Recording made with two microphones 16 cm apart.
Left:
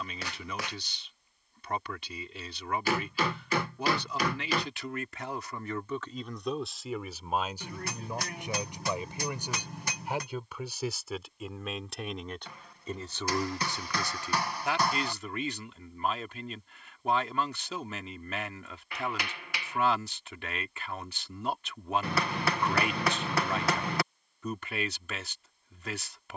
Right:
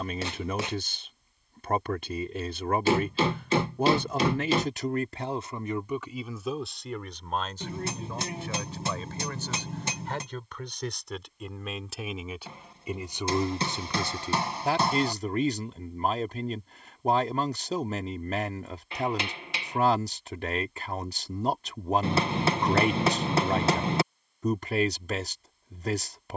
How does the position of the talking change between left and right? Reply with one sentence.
In this clip you hear the talking go left and come back.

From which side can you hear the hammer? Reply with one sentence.
In this clip you hear the hammer on the right.